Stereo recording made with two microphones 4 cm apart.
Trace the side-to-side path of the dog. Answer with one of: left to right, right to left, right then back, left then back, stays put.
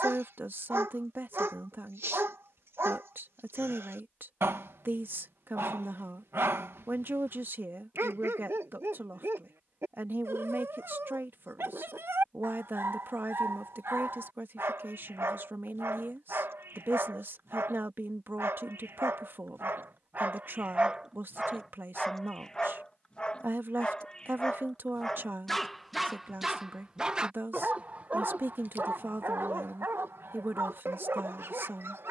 left then back.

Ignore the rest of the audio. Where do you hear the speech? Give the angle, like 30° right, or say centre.
60° right.